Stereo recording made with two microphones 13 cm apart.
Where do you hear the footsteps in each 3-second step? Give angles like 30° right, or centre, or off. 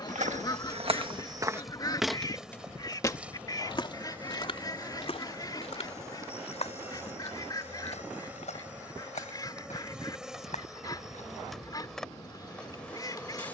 40° right, 40° left, 50° left, 60° left, off.